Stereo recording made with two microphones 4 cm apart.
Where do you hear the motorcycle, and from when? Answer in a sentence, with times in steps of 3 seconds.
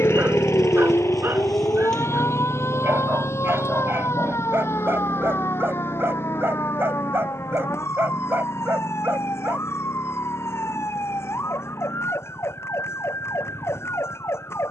In this clip you hear the motorcycle in the centre from 0 s and on the left from 3 s.